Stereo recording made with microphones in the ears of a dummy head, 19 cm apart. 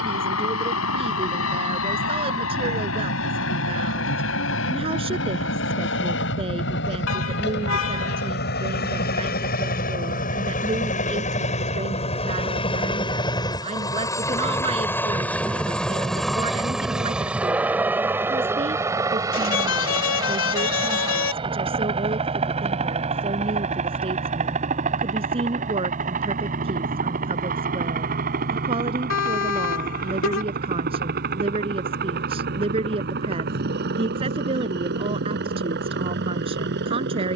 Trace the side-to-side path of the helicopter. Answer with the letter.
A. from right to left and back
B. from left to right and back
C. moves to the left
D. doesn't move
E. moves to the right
E.